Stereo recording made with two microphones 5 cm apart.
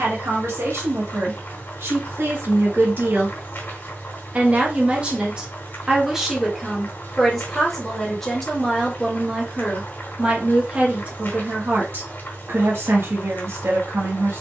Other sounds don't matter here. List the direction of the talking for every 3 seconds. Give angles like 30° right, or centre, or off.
70° right, 30° right, centre, 30° right, 60° right.